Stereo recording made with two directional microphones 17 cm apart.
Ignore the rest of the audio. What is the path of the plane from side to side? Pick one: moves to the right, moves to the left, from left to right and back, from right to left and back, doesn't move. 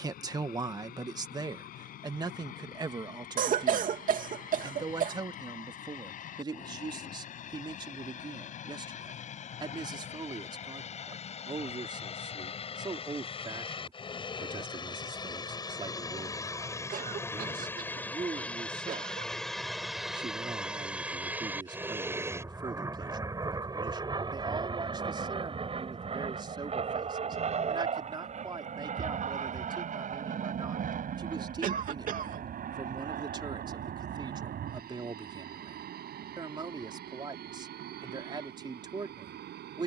moves to the right.